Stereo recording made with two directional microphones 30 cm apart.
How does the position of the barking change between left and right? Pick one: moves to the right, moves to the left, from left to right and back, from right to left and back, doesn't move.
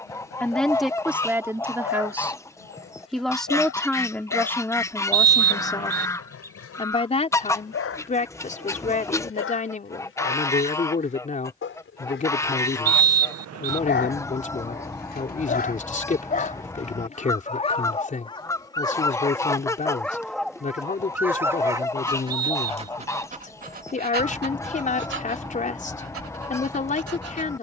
moves to the right.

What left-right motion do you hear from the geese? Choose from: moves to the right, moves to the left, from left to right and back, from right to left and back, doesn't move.
doesn't move.